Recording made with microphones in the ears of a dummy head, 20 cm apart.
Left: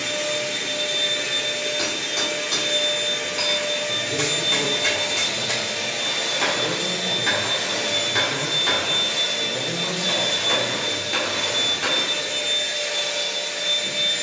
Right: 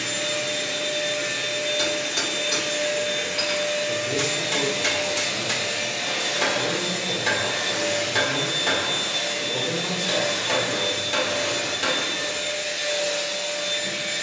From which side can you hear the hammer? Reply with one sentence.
In this clip you hear the hammer in the centre.